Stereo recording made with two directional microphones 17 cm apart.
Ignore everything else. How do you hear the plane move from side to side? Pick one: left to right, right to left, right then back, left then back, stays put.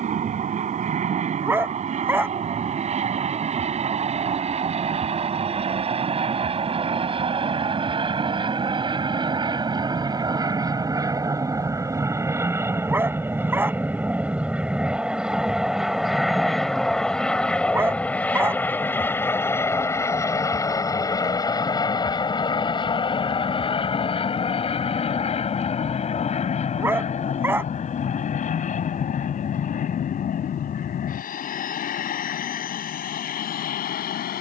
right to left.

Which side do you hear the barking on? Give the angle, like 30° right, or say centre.
10° right.